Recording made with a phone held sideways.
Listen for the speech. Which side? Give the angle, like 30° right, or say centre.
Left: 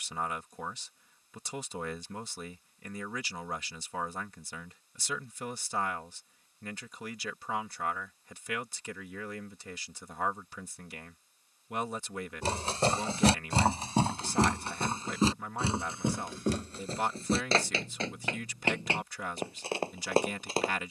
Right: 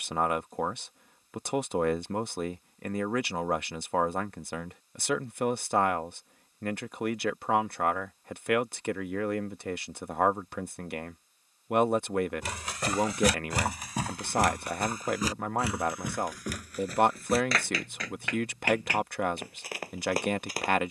60° right.